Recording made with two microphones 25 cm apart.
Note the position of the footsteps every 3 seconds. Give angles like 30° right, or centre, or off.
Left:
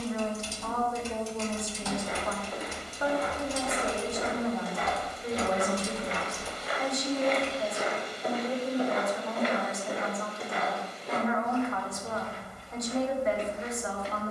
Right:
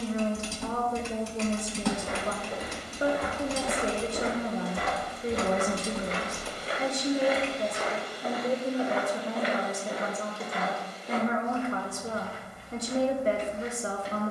80° right, 60° right, centre, 60° left, 70° left.